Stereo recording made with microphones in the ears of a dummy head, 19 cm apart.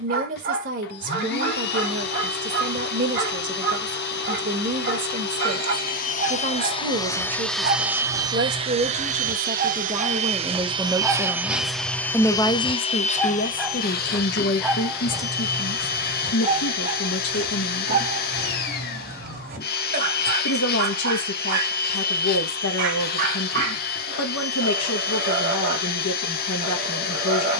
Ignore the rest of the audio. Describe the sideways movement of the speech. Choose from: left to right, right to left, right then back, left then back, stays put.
right to left.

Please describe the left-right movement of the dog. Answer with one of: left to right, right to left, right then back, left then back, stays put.
left then back.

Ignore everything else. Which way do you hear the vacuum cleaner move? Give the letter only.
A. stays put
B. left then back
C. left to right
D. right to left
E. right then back
E.